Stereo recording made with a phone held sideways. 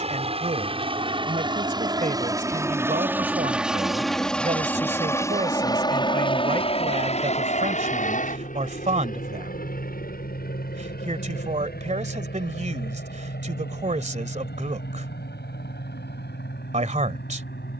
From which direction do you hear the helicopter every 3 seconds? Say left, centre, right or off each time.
right, centre, left, left, left, left.